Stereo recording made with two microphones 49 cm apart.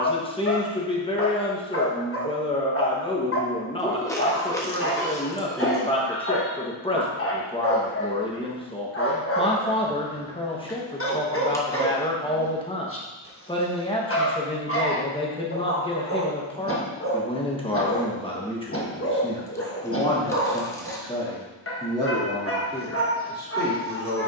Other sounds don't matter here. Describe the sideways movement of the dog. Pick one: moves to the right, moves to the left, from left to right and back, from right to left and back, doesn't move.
doesn't move.